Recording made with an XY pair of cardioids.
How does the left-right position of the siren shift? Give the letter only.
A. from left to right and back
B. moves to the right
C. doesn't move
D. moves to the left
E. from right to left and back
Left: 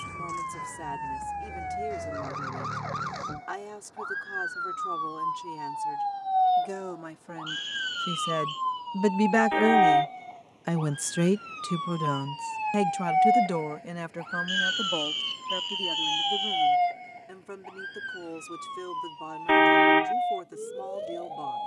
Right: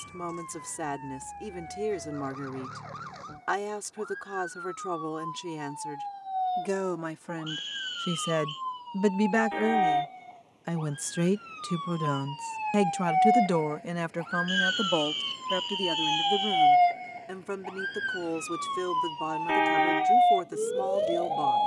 B.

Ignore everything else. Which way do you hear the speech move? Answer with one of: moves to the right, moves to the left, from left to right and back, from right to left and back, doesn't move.
from right to left and back.